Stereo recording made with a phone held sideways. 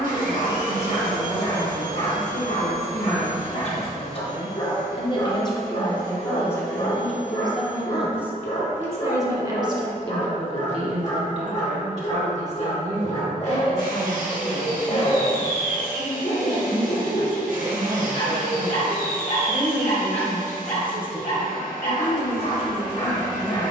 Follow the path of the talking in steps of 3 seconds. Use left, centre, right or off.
left, left, centre, right, right, right, centre, left.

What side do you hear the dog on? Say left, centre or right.
left.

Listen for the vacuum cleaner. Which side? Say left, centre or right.
right.